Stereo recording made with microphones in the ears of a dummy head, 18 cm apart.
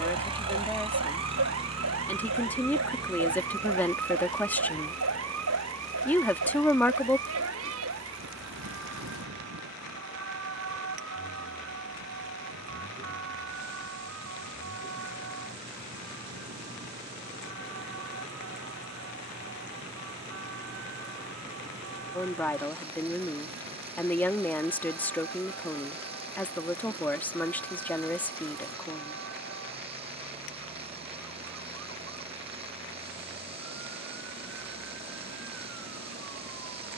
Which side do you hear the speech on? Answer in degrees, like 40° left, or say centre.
10° left.